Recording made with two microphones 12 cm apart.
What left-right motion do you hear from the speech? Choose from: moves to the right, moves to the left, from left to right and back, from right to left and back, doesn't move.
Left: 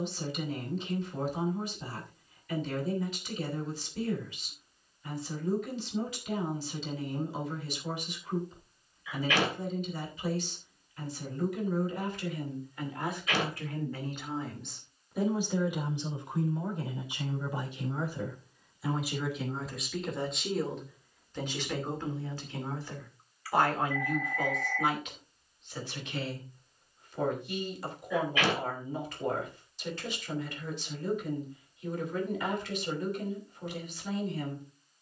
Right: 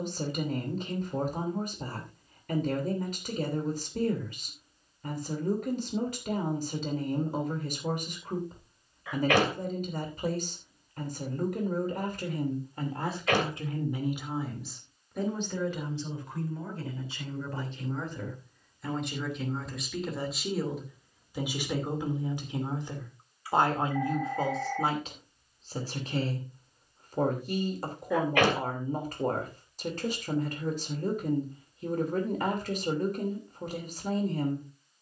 from right to left and back.